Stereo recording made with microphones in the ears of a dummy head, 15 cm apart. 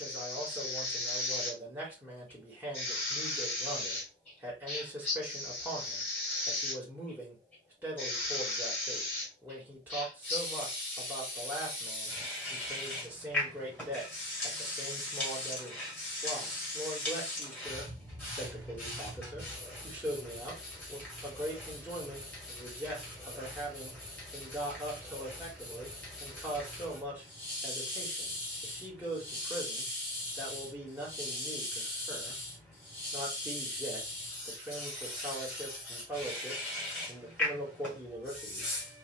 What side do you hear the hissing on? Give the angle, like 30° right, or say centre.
10° left.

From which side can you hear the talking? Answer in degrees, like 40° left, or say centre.
10° right.